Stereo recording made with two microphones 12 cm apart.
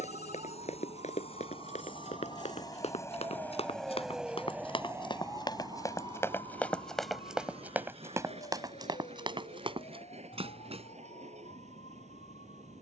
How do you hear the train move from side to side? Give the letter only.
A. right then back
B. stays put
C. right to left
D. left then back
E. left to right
E.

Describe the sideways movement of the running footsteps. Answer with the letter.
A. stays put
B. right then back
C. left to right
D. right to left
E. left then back
C.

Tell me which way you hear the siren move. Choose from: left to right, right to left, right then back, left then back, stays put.
right to left.